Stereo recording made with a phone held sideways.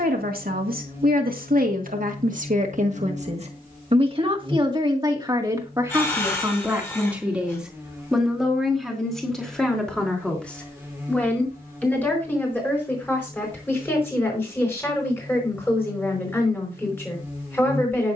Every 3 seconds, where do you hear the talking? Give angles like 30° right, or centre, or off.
70° right, 30° right, 10° right, 10° left, 10° left, 10° left.